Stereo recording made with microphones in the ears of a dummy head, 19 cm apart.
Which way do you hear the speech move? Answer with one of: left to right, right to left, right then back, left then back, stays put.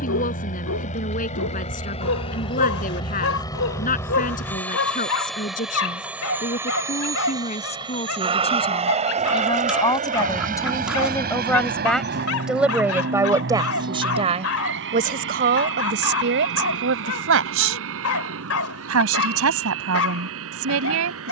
left to right.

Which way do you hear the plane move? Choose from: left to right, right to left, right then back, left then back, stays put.
left to right.